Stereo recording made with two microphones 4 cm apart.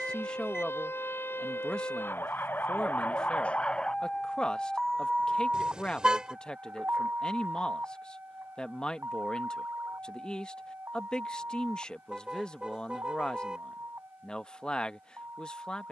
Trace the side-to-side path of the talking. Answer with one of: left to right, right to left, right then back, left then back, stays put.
stays put.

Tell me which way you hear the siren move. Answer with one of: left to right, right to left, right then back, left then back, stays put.
left to right.